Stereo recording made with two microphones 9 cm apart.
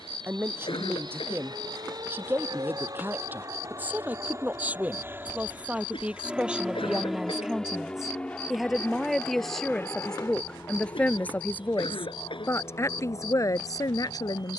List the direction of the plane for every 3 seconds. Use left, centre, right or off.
right, right, centre, left, left.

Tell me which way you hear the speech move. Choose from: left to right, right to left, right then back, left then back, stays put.
right to left.